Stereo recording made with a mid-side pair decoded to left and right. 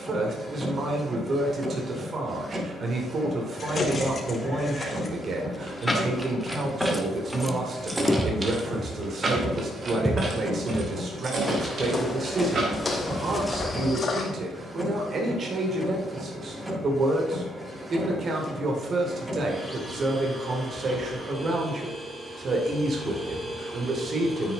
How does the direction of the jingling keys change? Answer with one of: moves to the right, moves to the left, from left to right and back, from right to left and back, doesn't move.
moves to the right.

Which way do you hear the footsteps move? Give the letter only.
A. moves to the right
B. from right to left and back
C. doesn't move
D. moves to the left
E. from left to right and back
D.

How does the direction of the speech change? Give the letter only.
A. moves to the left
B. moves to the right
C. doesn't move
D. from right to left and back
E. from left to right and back
C.